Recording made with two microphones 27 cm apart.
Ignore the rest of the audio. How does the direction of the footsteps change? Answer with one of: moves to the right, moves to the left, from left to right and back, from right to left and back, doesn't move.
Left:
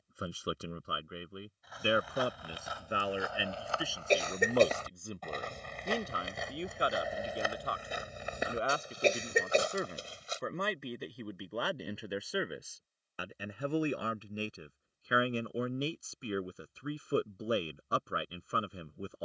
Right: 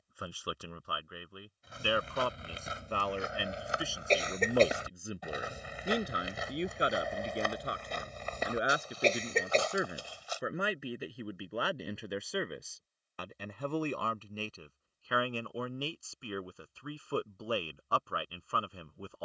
moves to the left.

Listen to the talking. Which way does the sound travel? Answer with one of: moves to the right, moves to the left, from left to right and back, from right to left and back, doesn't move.
from left to right and back.